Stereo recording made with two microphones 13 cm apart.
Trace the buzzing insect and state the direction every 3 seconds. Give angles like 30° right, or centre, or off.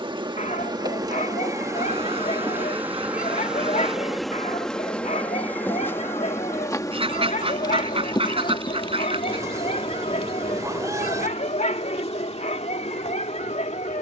30° right, centre, 30° left, 50° left, 50° left.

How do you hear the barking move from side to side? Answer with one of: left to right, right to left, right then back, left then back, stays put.
stays put.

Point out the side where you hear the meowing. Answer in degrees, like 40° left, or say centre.
20° right.